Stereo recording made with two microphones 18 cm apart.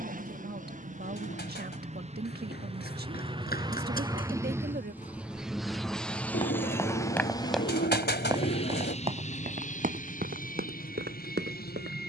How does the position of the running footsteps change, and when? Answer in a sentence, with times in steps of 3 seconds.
You can hear the running footsteps on the left from 0 s, in the centre from 6 s and on the right from 9 s.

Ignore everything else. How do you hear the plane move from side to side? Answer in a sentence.
You can hear the plane move from right to left.